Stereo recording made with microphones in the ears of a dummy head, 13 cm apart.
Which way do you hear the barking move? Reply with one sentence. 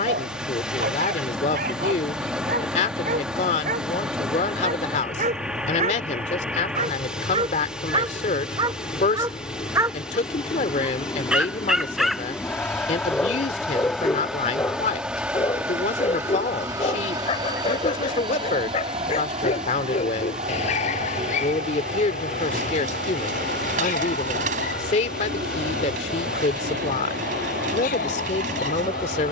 You can hear the barking move to the left.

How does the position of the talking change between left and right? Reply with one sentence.
In this clip you hear the talking stay put.